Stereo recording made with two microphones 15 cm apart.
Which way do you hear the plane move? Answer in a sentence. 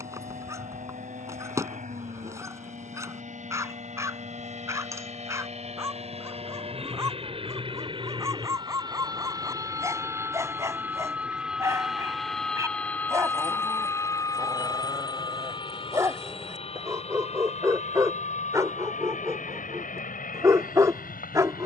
You can hear the plane move to the left.